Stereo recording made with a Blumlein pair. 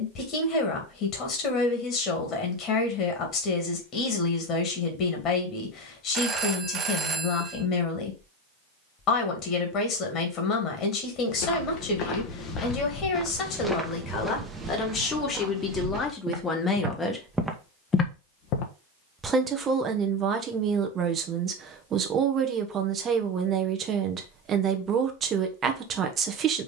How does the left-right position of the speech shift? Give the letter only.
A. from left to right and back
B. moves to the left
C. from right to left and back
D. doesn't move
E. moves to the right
E.